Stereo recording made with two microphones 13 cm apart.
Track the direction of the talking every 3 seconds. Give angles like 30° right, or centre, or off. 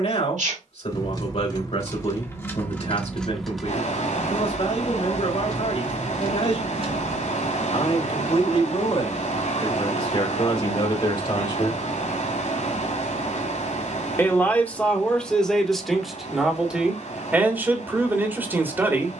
60° left, 60° left, 50° left, 40° left, 10° left, centre, 20° right.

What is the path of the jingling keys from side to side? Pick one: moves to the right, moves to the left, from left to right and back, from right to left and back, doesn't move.
moves to the right.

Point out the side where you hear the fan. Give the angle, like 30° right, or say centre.
70° left.